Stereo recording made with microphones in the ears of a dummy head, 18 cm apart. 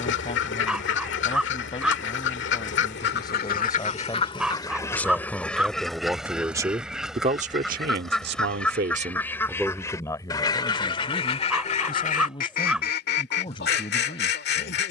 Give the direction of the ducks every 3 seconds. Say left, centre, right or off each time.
left, left, centre, left, left.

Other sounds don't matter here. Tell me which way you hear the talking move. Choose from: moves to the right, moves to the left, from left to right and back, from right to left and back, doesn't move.
from left to right and back.